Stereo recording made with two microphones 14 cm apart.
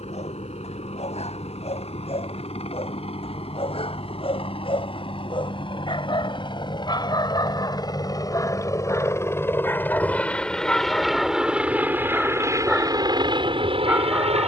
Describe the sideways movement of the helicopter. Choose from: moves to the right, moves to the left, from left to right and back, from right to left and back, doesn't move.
moves to the right.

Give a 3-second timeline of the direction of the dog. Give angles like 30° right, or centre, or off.
50° left, 40° left, 30° left, 10° left, 10° right.